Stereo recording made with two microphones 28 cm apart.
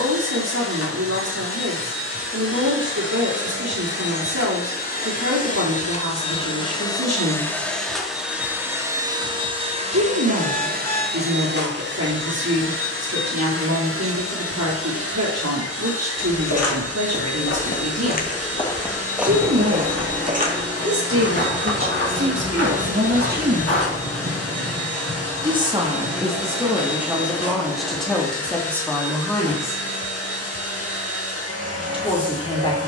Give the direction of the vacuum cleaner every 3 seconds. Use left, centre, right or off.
left, left, centre, right, right, right, right, right, right, right, right.